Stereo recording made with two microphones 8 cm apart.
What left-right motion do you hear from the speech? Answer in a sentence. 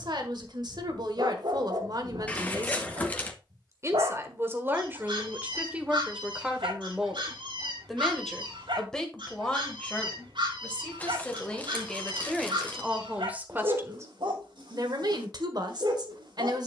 In this clip you hear the speech move from right to left and back again.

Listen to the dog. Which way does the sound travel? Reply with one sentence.
You can hear the dog stay put.